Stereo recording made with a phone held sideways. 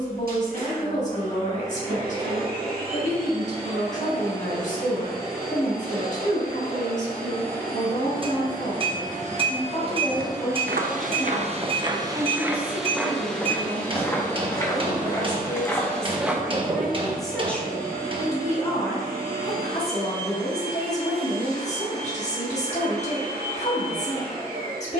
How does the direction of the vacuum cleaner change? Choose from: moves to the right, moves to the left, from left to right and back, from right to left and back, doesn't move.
from right to left and back.